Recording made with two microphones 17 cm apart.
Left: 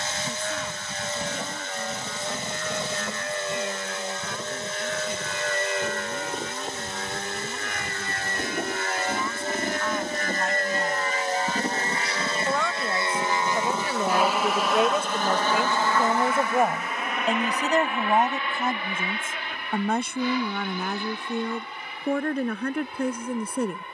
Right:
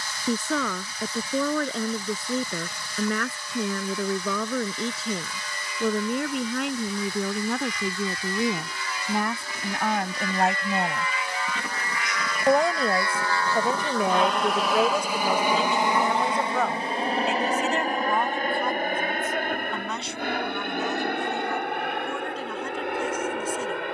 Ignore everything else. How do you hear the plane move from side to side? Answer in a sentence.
You can hear the plane travel towards the right.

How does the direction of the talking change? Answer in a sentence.
In this clip you hear the talking move from right to left.